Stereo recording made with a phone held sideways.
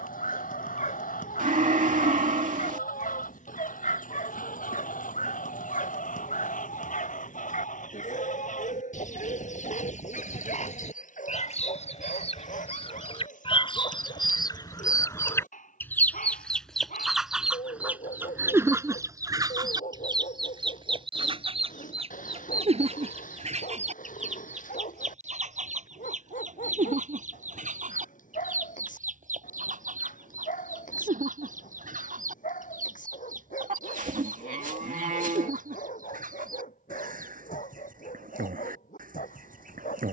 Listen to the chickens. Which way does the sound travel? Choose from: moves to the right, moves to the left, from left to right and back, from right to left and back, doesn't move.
moves to the right.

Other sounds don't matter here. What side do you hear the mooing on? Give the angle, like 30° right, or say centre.
70° right.